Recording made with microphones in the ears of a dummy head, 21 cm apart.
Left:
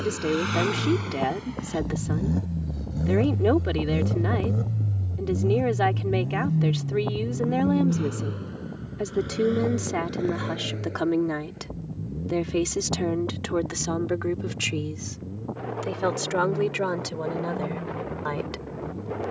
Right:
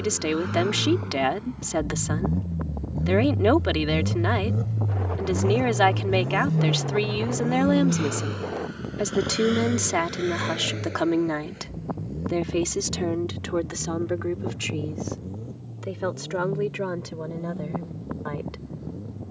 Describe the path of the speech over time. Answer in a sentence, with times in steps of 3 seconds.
In this clip you hear the speech on the right from 0 s, in the centre from 12 s and on the left from 15 s.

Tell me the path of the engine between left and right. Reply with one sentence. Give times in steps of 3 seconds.
In this clip you hear the engine on the left from 0 s, in the centre from 3 s and on the right from 6 s.